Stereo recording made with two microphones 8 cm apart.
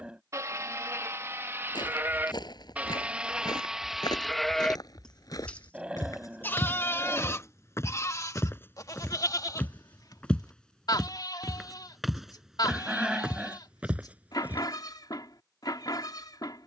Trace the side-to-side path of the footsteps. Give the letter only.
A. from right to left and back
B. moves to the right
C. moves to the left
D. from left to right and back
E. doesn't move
B.